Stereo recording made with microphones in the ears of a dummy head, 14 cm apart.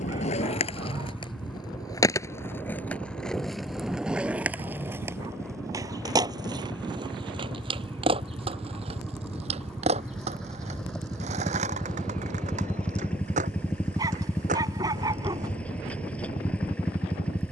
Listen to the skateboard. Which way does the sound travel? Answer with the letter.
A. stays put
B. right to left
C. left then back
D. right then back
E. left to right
E.